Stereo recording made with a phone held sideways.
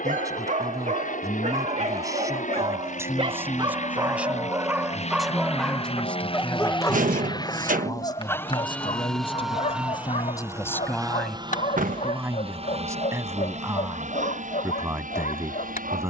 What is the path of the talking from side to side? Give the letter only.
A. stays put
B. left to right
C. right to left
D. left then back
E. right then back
D.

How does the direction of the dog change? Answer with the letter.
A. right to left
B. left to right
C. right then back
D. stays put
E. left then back
A.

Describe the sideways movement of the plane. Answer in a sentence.
You can hear the plane go from the left side to the right.